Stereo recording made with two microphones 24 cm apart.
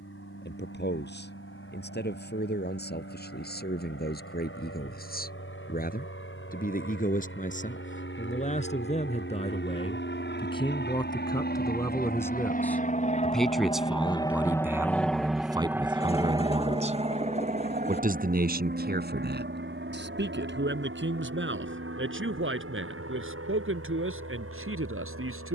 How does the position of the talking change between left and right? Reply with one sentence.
You can hear the talking move to the right.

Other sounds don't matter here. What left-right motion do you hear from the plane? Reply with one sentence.
You can hear the plane travel towards the right.